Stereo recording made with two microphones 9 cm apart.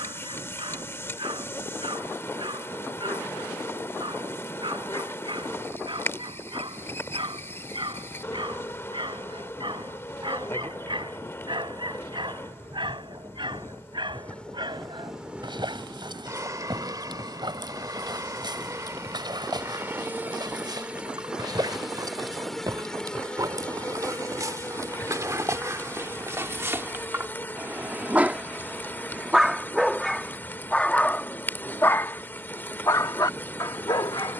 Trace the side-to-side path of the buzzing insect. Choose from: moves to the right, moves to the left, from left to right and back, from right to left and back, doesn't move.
from left to right and back.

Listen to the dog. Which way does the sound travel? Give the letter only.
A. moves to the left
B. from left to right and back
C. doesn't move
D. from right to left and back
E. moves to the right
A.